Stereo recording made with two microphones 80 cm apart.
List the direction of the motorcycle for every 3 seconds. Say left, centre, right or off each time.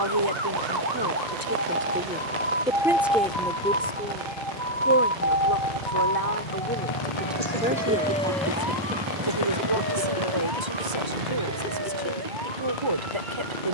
left, left, left, right, right.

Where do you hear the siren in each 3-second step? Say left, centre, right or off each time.
right, centre, left, left, left.